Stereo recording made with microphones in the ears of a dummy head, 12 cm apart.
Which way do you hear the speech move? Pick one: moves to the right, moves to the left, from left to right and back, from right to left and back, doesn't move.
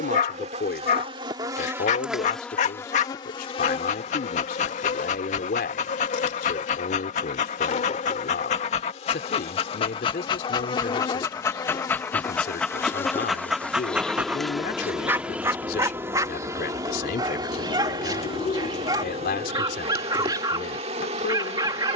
doesn't move.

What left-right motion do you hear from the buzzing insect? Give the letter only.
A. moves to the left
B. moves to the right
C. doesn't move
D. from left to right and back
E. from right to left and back
E.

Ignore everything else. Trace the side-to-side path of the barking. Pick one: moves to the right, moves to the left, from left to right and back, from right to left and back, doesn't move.
moves to the right.